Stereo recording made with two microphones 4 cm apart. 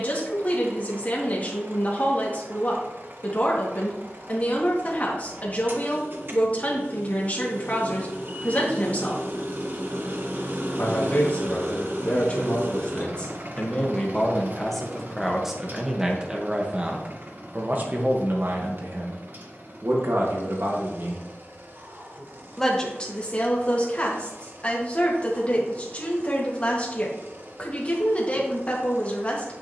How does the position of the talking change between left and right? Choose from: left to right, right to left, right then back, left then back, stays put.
right then back.